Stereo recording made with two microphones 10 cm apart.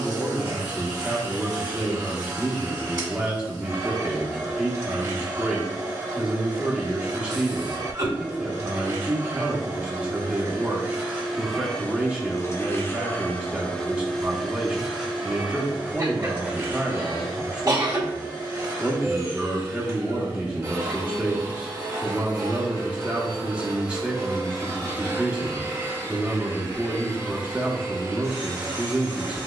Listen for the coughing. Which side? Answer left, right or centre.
right.